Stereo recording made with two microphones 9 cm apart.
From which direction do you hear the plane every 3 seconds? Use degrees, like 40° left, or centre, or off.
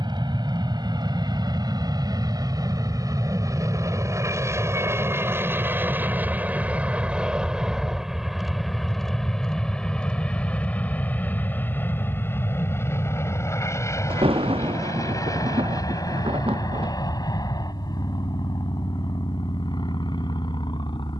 50° right, 30° right, 10° right, 10° left, 30° left, 40° left, 50° left.